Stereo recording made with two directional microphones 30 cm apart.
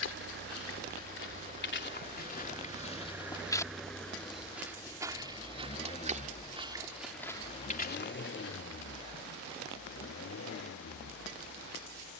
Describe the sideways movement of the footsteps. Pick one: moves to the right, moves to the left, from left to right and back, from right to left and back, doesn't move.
from left to right and back.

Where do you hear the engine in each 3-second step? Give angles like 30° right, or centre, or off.
20° right, 10° left, 30° left, 50° left.